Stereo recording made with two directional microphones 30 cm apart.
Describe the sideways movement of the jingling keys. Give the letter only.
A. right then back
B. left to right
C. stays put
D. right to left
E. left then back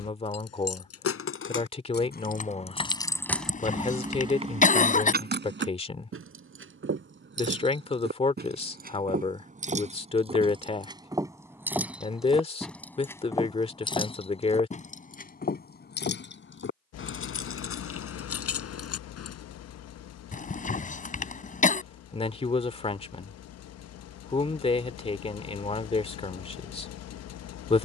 A.